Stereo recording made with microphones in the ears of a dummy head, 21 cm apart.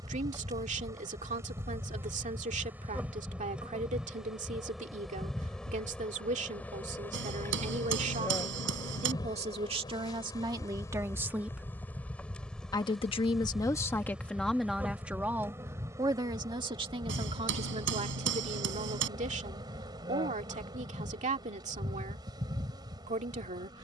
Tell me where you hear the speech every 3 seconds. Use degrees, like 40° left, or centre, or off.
30° right, 30° right, 30° right, 20° right, 10° left, 20° right, 30° right, 30° right.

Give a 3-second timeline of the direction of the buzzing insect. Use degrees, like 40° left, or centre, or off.
10° right, centre, 10° left, 10° left, centre, 20° right, 20° right, 20° right.